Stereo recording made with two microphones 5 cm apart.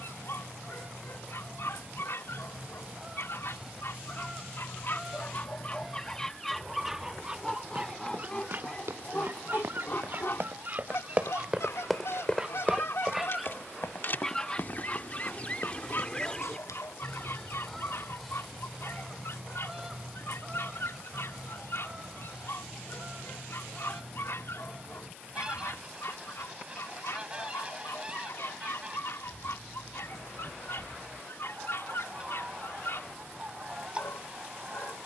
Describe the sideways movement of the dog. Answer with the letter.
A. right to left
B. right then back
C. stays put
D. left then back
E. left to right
B.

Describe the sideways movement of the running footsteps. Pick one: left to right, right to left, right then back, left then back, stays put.
right to left.